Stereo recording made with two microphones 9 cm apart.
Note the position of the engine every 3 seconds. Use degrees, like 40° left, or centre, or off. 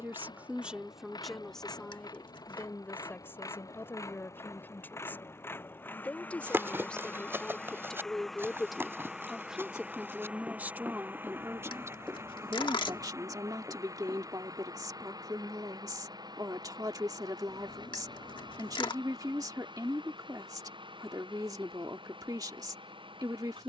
50° left, 30° left, 10° left, 20° right, 40° right, 50° right, 60° right, 60° right.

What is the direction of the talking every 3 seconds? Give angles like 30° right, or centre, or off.
centre, 20° left, 10° left, 20° right, 40° right, 40° right, 40° right, 40° right.